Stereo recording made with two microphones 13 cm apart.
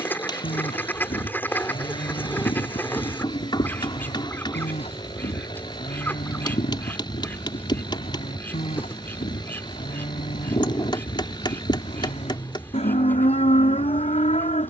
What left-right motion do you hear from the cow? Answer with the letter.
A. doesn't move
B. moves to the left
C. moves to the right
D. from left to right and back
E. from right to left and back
A.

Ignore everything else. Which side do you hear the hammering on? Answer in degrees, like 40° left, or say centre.
40° left.